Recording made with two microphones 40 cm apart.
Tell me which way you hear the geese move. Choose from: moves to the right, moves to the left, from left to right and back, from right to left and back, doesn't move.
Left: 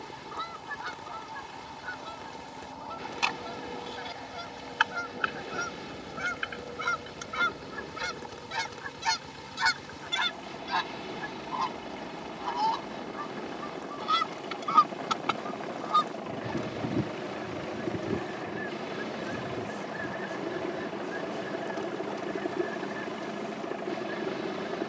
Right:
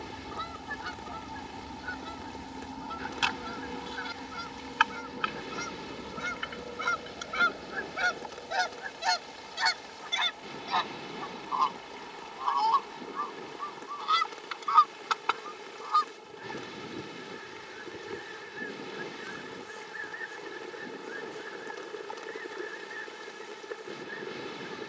moves to the left.